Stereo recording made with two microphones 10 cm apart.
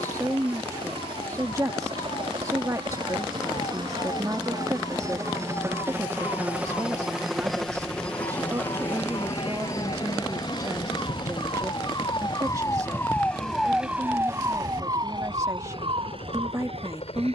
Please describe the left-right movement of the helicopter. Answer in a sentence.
In this clip you hear the helicopter move to the left.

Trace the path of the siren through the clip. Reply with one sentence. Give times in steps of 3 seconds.
In this clip you hear the siren on the left from 0 s, in the centre from 12 s and on the right from 15 s.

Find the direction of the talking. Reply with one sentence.
In this clip you hear the talking on the right.